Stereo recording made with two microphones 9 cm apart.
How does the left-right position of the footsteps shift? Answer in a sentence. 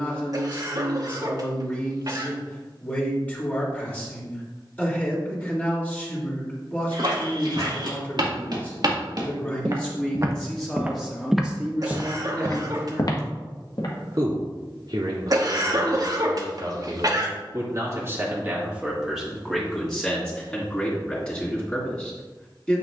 You can hear the footsteps travel towards the left.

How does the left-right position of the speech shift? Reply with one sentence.
You can hear the speech go right and come back.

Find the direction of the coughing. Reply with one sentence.
In this clip you hear the coughing on the right.